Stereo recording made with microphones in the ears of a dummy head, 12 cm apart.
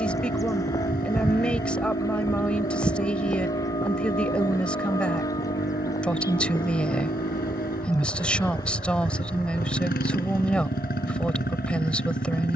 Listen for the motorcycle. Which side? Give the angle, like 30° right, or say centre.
70° left.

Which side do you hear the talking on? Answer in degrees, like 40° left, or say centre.
10° left.